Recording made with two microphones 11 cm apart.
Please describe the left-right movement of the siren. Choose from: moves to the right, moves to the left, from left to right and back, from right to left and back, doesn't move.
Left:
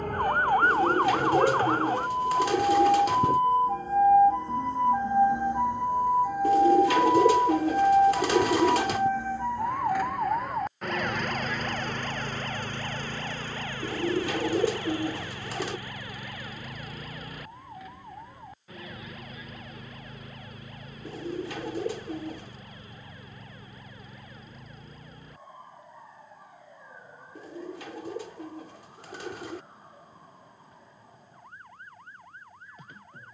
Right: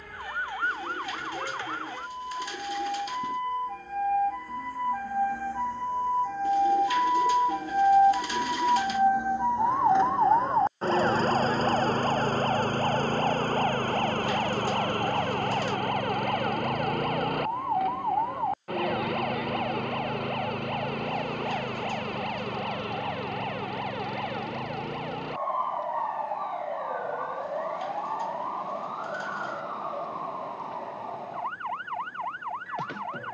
moves to the right.